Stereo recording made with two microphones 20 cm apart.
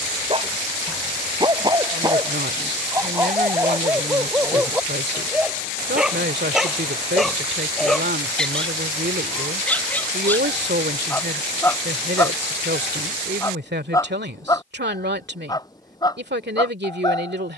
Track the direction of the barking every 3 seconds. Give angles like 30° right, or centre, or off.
20° right, 10° right, centre, 10° left, 20° left, 20° left.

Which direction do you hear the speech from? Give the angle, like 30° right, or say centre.
60° right.